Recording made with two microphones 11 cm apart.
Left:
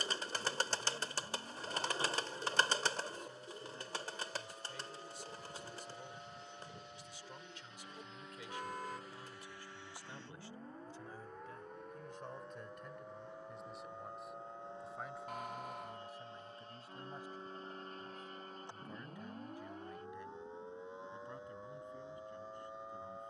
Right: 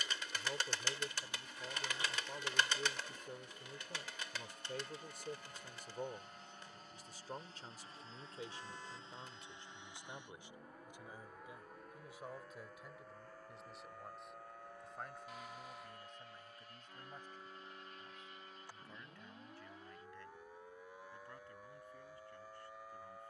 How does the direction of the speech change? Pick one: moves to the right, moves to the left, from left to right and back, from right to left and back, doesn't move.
moves to the left.